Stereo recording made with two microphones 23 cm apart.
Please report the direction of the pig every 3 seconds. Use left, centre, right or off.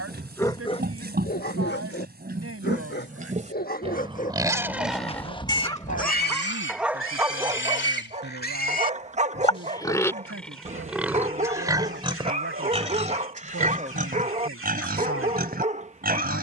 right, centre, left, centre, right, right.